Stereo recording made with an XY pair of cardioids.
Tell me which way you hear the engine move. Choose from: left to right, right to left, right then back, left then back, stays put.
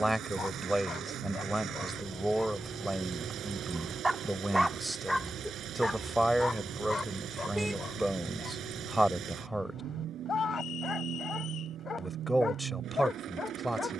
stays put.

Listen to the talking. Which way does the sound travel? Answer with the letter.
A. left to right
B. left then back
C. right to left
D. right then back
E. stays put
E.